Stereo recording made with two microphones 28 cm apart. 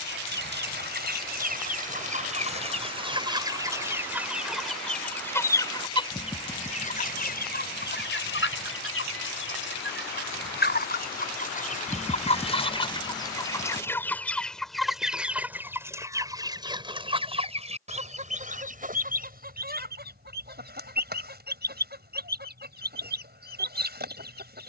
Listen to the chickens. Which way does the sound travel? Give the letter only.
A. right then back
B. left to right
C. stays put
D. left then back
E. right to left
D.